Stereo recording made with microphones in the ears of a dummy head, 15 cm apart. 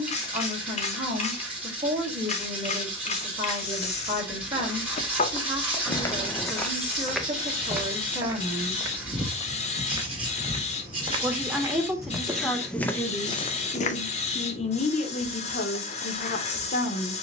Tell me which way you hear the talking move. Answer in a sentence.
You can hear the talking go from the right side to the left.